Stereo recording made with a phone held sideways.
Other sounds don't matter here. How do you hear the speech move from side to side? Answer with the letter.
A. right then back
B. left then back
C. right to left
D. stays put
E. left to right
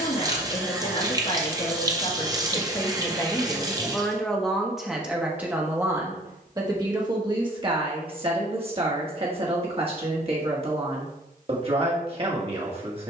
E.